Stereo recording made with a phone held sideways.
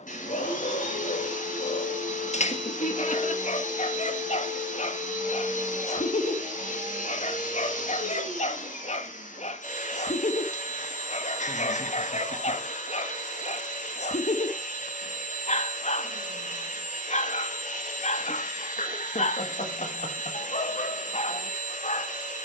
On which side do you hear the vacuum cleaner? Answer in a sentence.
In this clip you hear the vacuum cleaner on the left.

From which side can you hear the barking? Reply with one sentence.
In this clip you hear the barking on the left.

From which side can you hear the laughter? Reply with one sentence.
You can hear the laughter on the left.